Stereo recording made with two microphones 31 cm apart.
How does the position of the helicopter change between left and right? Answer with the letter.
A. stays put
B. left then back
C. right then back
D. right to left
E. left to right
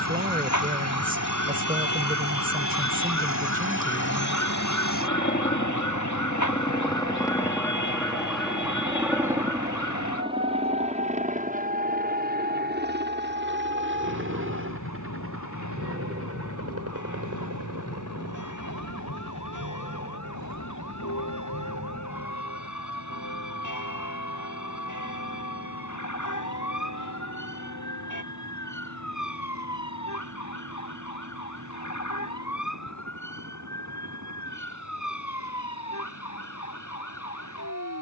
E.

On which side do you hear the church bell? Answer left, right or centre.
left.